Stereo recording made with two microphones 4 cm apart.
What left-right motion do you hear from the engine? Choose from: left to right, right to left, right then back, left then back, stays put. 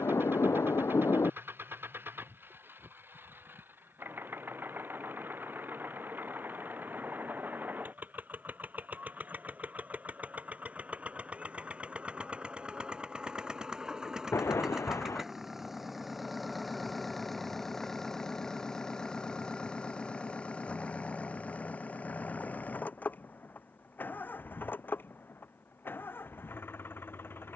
right to left.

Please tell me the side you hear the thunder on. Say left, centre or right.
left.